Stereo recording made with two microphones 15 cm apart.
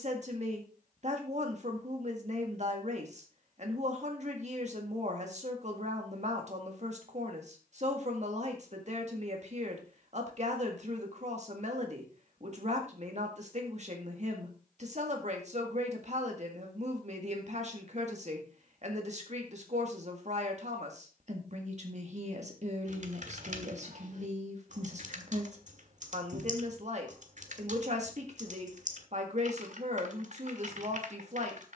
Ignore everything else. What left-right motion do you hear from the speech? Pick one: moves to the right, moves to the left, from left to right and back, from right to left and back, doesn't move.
doesn't move.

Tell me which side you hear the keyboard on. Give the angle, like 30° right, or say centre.
60° right.